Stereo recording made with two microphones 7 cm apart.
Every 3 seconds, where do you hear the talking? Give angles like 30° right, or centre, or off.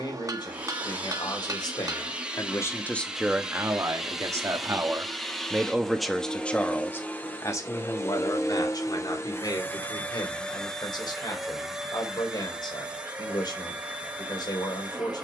60° left, 30° right, 40° left, 70° left, 70° left.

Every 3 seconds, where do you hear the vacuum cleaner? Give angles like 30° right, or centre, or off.
20° right, centre, 30° left, 10° left, 20° right.